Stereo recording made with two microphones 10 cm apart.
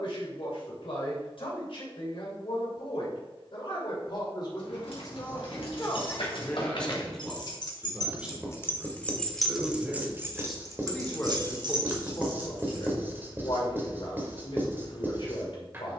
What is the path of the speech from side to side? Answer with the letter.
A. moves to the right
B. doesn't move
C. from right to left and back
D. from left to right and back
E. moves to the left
D.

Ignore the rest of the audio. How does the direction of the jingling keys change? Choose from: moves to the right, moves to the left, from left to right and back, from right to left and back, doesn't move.
moves to the right.